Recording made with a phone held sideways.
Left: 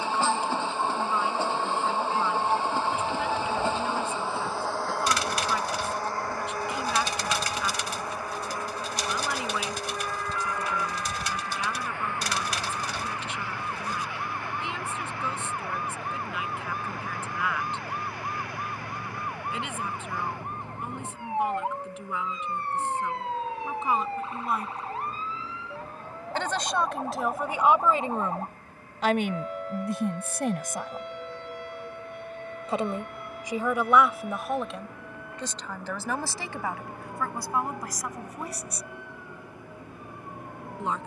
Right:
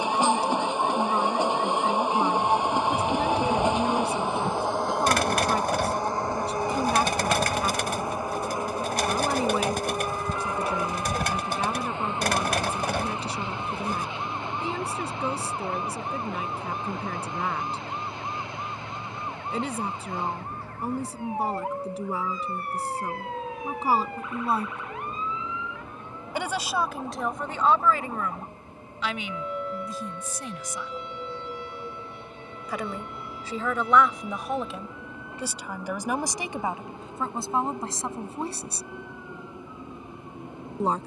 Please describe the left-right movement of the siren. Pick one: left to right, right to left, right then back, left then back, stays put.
right to left.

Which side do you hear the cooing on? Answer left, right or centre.
right.